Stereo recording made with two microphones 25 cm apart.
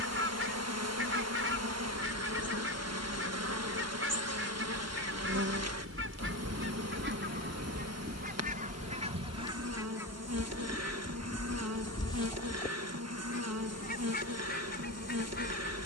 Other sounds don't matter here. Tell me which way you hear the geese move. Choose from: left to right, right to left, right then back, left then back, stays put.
right to left.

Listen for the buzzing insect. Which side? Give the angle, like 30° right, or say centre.
80° right.